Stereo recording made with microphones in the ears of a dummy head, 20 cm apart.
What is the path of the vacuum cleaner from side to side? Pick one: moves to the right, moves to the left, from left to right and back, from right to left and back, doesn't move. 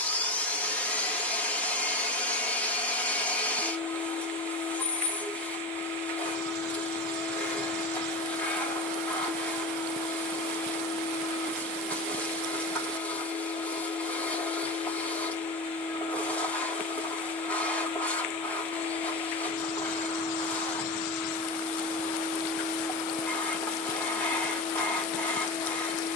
doesn't move.